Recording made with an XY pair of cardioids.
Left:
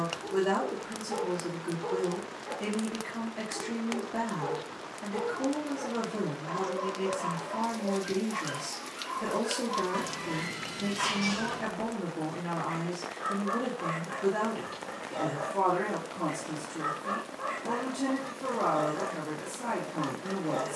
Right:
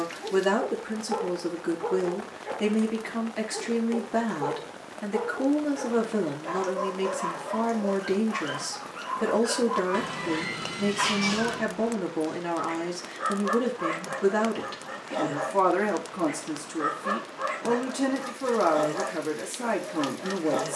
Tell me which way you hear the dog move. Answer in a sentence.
You can hear the dog stay in one place.